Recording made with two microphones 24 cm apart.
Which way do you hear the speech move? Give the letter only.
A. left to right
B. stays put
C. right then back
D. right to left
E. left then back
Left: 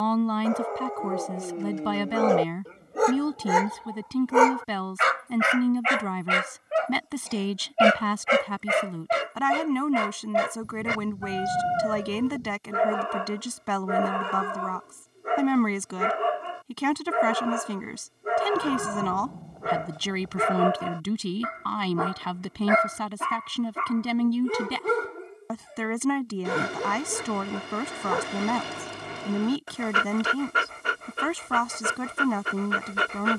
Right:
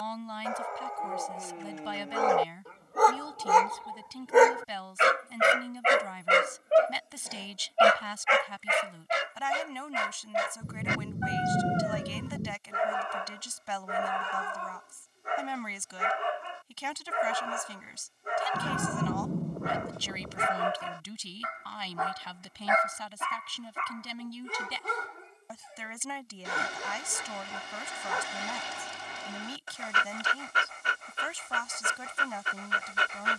B.